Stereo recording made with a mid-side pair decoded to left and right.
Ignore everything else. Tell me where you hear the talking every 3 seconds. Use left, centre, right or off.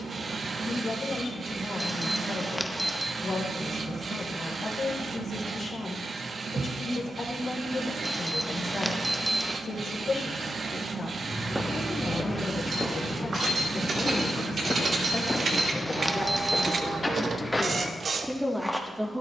left, left, left, left, left, left, centre.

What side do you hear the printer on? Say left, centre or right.
right.